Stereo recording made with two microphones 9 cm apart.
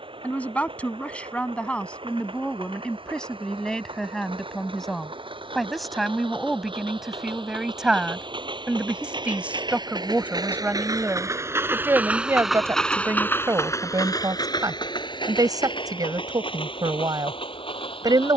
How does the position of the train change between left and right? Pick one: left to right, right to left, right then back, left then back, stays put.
right to left.